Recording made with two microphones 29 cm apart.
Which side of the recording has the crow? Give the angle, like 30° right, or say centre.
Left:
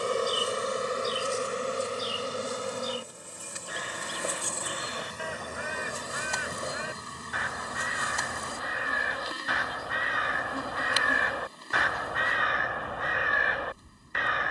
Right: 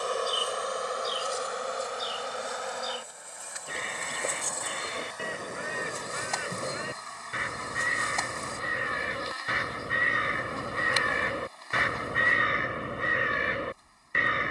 30° right.